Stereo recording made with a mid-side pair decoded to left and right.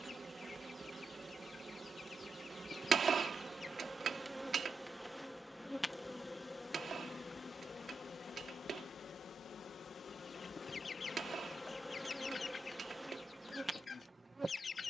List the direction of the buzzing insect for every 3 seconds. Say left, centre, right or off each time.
right, centre, left, left, centre.